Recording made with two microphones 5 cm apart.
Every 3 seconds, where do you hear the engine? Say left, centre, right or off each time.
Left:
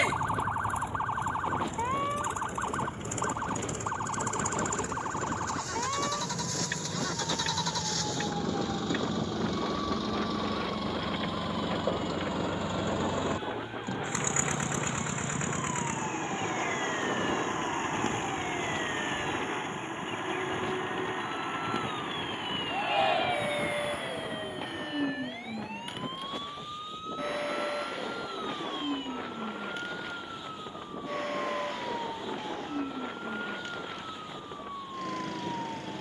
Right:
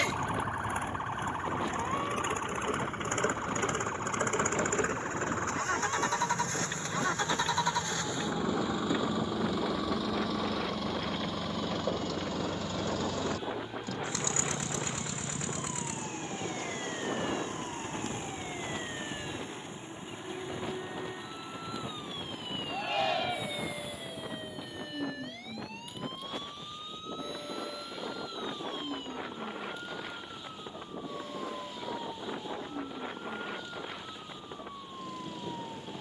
right, right, right, centre, left, left, left, left, left, left, left, left.